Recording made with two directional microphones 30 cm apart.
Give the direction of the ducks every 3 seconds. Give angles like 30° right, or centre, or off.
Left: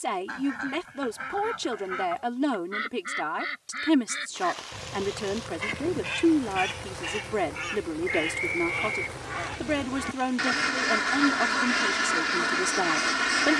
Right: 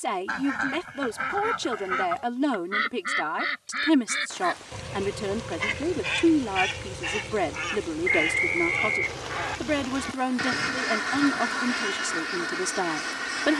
40° right, 30° right, 20° right, 10° left, 40° left.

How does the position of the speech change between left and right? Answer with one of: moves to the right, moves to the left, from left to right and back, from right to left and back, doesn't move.
doesn't move.